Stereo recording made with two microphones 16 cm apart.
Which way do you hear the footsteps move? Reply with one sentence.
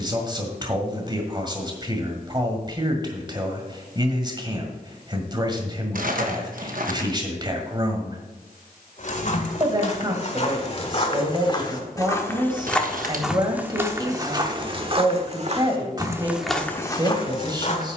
You can hear the footsteps move from left to right and back again.